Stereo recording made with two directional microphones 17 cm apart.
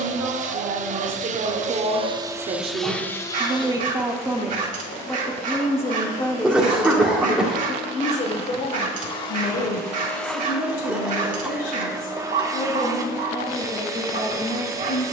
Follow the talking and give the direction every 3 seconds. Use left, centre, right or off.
right, centre, left, left, left.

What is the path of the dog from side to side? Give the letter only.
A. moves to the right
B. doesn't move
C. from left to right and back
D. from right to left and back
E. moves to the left
B.